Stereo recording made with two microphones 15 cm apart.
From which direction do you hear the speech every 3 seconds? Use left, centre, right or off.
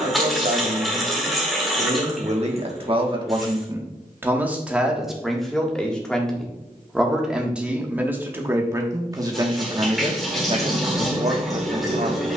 right, centre, centre, right.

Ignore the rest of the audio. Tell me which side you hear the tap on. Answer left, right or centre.
centre.